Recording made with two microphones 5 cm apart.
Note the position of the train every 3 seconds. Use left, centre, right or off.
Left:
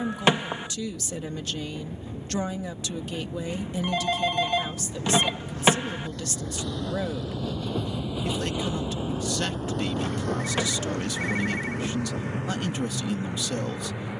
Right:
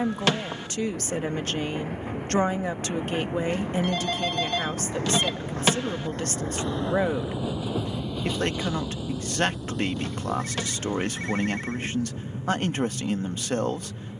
right, right, centre, left, left.